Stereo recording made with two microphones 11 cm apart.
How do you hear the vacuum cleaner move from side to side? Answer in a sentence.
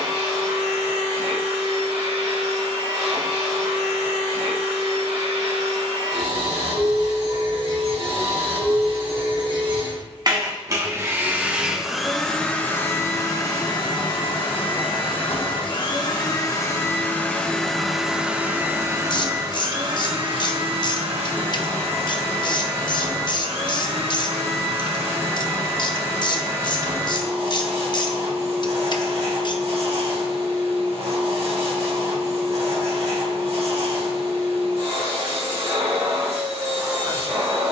In this clip you hear the vacuum cleaner move from right to left and back again.